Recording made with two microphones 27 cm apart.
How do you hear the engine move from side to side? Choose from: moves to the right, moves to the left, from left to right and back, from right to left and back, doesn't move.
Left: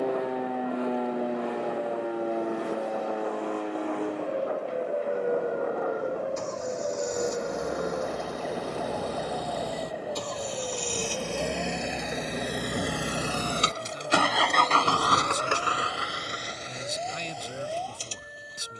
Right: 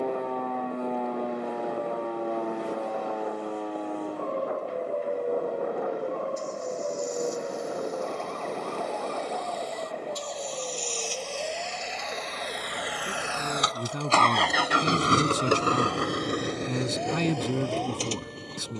moves to the right.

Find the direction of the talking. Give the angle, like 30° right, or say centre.
70° right.